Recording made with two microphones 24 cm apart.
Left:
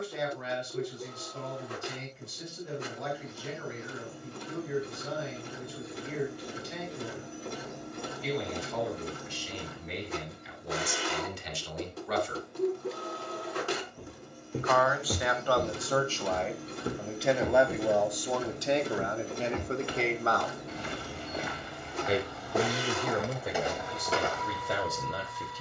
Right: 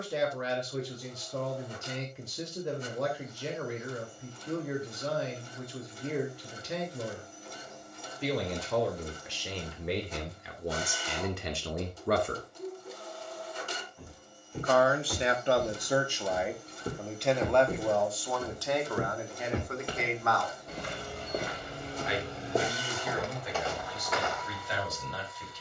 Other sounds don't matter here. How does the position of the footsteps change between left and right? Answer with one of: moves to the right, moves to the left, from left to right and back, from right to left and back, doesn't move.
from left to right and back.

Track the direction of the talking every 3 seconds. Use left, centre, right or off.
right, right, right, right, right, centre, left, left, left.